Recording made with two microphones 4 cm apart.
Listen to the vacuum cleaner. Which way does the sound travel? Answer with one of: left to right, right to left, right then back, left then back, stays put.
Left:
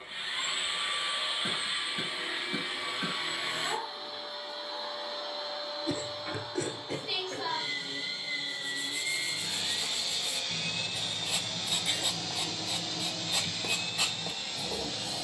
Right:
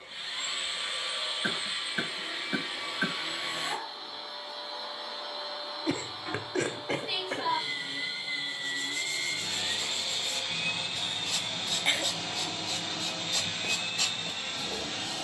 left to right.